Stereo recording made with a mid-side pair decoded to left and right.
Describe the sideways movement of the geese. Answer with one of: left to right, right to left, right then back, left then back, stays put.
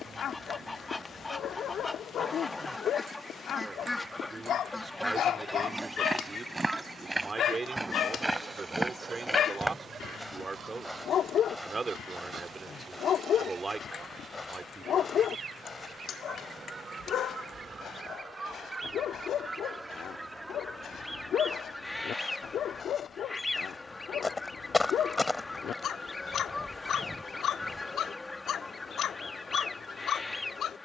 right then back.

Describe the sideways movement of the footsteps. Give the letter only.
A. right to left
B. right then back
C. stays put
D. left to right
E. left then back
E.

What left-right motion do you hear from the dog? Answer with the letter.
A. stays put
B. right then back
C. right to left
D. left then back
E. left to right
A.